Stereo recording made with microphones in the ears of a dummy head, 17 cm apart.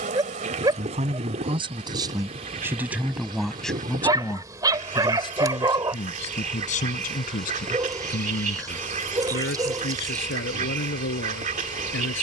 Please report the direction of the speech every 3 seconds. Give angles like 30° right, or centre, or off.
20° right, 10° left, 40° left, 60° left.